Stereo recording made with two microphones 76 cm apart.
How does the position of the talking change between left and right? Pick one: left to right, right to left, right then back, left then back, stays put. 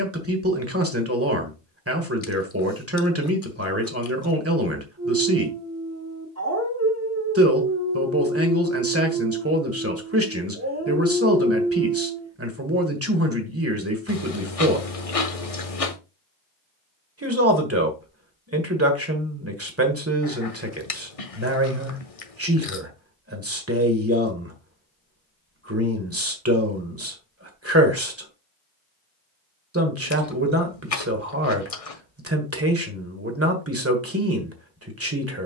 stays put.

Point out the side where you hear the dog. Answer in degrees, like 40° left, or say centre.
20° right.